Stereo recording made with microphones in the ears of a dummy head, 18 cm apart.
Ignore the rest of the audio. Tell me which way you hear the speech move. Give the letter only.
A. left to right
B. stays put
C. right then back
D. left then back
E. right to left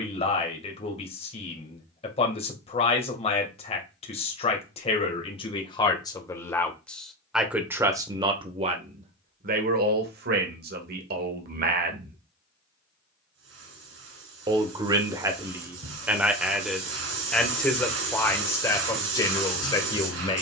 C.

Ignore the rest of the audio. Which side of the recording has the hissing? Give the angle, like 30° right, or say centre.
70° right.